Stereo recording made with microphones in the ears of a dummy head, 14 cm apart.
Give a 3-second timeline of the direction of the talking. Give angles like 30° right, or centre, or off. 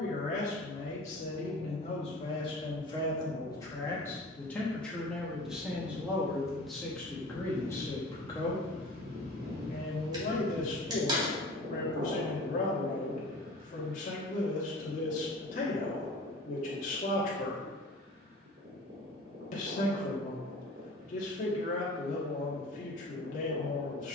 40° left, 10° left, 10° left, 50° left, 50° left, 50° left, 50° left, 50° left.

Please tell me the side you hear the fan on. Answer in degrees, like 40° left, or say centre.
60° right.